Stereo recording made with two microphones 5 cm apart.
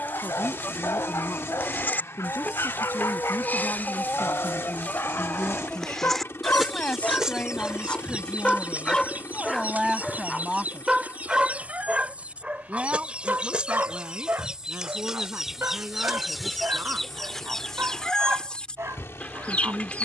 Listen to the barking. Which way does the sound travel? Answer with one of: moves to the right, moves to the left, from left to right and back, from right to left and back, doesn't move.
moves to the right.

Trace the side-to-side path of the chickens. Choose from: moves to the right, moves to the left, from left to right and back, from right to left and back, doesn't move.
from left to right and back.